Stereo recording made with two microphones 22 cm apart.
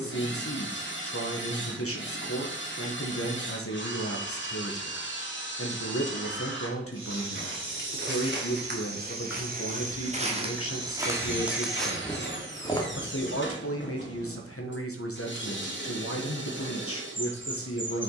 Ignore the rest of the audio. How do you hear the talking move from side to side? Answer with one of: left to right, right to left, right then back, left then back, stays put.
stays put.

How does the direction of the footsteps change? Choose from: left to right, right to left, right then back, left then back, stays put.
right to left.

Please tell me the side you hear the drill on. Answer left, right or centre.
left.